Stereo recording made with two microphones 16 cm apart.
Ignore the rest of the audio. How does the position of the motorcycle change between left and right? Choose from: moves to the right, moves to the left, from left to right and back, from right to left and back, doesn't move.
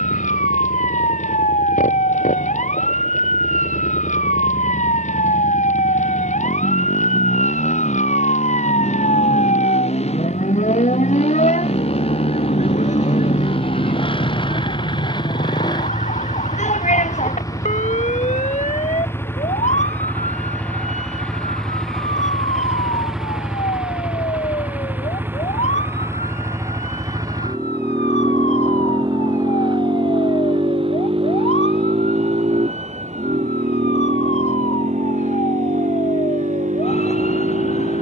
moves to the right.